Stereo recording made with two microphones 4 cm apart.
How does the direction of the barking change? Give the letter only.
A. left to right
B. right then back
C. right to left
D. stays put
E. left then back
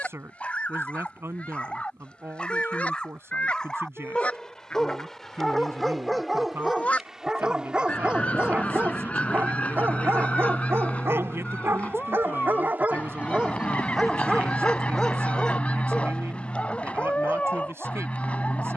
B.